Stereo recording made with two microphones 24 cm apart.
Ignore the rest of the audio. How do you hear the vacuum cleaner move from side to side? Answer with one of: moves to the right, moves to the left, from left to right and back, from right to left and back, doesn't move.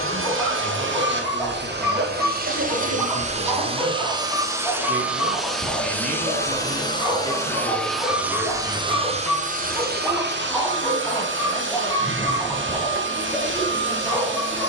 from right to left and back.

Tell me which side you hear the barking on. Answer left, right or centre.
centre.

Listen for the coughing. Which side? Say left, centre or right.
right.